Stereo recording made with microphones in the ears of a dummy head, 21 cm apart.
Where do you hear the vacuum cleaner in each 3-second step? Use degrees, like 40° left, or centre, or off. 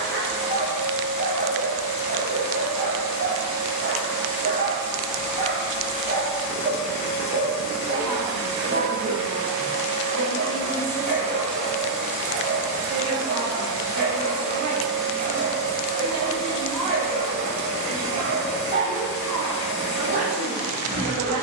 50° left, 50° left, 50° left, 20° left, 10° right, 30° left, 50° left.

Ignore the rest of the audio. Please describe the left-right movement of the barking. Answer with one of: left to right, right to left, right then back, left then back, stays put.
stays put.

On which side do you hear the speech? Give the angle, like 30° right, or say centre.
80° right.